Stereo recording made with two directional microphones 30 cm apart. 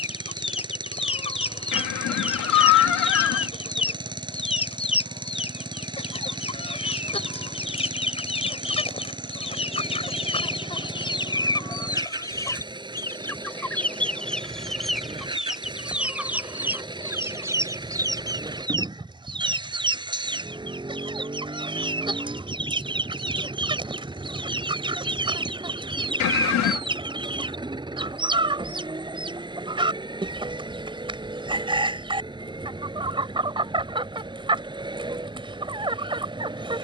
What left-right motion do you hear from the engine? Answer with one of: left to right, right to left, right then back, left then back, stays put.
stays put.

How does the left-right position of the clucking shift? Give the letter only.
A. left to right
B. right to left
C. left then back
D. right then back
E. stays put
A.